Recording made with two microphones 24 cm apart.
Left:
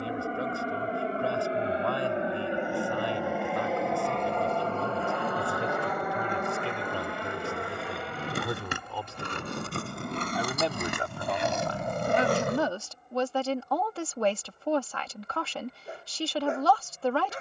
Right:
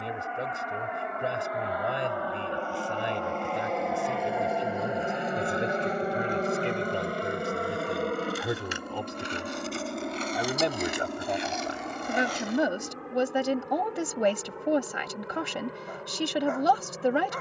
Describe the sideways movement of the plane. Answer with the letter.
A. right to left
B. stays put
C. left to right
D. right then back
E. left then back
C.